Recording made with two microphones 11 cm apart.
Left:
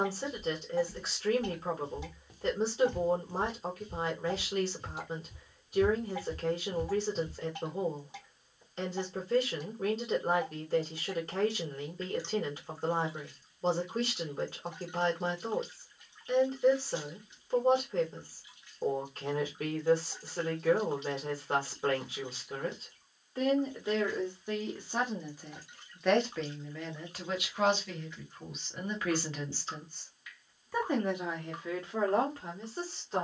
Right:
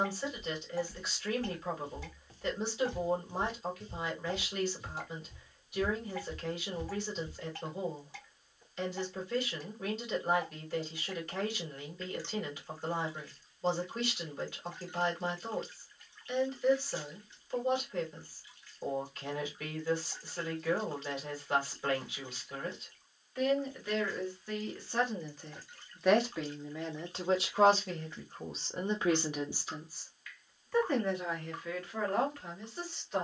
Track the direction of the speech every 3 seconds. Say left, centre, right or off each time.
left, left, left, left, left, left, left, left, centre, right, left.